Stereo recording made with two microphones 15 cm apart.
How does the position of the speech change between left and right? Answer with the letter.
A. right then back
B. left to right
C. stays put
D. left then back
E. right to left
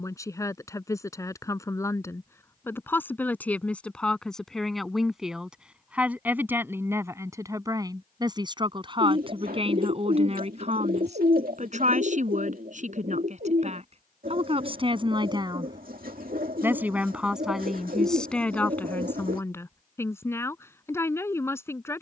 A.